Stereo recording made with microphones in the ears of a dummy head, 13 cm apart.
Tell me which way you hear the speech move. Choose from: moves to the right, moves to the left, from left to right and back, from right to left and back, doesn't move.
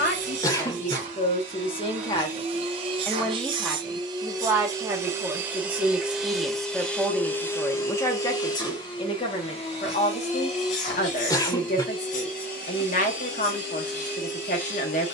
from left to right and back.